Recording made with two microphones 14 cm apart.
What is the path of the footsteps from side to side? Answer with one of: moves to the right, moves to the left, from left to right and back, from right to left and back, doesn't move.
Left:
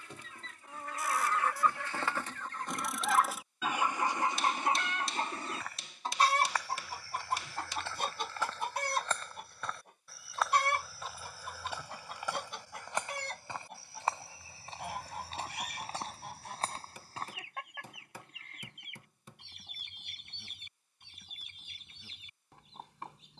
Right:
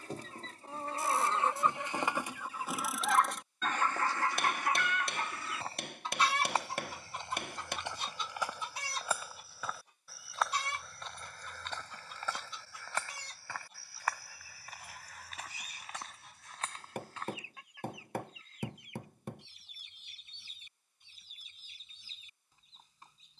moves to the left.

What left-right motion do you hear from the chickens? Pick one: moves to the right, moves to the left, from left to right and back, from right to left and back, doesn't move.
moves to the left.